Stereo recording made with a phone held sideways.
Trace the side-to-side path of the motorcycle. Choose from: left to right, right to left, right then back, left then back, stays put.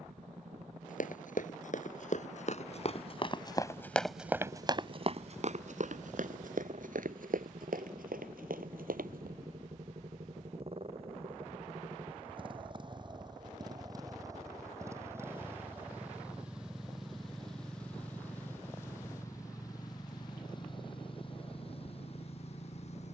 right to left.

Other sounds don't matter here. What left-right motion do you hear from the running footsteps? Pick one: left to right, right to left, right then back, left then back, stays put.
left to right.